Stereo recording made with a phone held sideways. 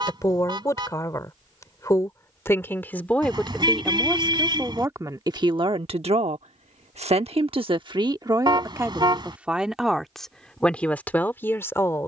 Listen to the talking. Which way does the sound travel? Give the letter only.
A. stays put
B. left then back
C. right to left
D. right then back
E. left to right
D.